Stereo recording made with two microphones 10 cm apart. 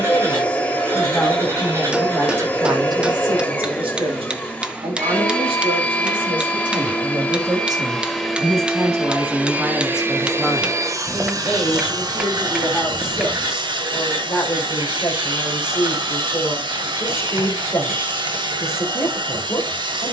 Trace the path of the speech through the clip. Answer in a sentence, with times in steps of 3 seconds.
In this clip you hear the speech in the centre from 0 s, on the right from 3 s, in the centre from 9 s and on the left from 12 s.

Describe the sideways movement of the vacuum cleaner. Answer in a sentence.
You can hear the vacuum cleaner travel towards the right.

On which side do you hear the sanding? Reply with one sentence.
You can hear the sanding on the right.